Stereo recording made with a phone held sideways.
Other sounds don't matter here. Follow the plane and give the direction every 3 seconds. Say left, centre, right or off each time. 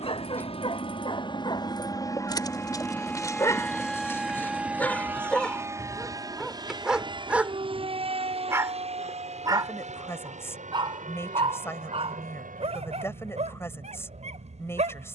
left, centre, right, right, right.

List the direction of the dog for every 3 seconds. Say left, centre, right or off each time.
left, centre, centre, right, right.